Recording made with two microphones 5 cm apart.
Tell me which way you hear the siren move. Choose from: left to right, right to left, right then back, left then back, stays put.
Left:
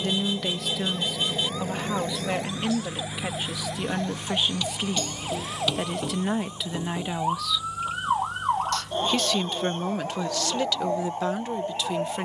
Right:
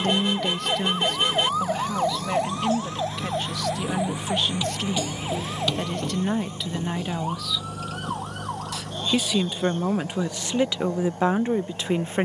right to left.